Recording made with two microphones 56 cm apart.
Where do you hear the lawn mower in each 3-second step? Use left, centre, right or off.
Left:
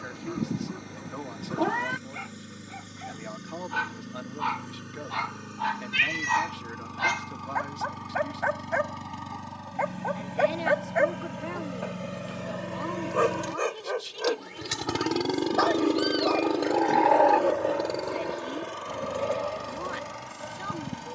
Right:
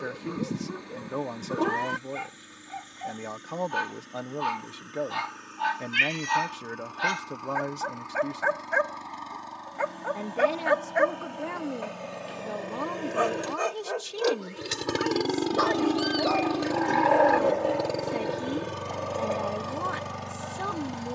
left, left, left, left, left, right, right.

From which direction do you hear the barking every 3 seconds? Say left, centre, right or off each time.
right, right, right, right, centre, left, left.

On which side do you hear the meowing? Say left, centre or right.
centre.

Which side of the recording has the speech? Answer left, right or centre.
right.